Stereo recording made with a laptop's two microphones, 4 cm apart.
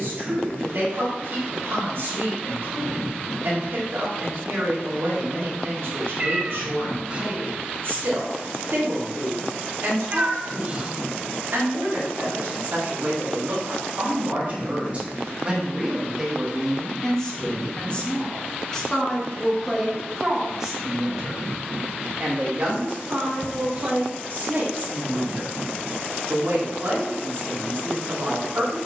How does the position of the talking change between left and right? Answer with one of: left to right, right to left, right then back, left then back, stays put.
left then back.